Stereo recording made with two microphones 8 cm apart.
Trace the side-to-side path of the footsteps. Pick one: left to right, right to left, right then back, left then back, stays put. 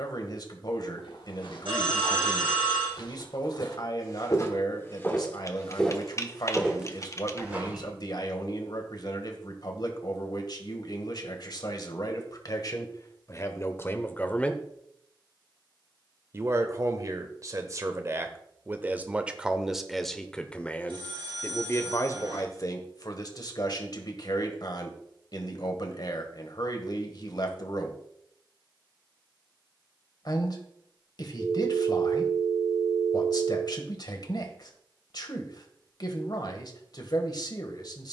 left to right.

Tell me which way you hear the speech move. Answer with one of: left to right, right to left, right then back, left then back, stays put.
right then back.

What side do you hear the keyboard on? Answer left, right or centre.
left.